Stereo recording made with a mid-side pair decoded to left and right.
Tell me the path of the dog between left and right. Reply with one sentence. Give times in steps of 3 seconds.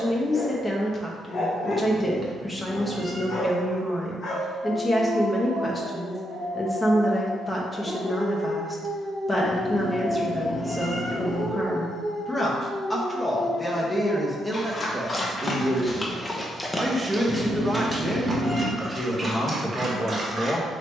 In this clip you hear the dog on the left from 0 s, in the centre from 15 s and on the right from 18 s.